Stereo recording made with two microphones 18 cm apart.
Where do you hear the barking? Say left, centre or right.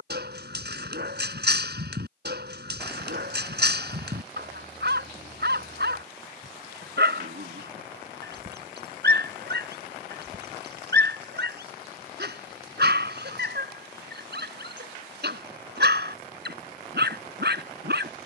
right.